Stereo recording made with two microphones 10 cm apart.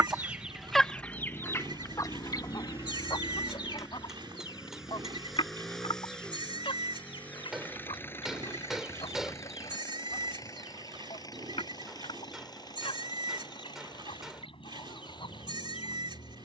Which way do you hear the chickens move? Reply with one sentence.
You can hear the chickens move from right to left.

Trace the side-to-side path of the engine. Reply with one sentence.
In this clip you hear the engine travel towards the left.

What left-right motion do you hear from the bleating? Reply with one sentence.
You can hear the bleating stay in one place.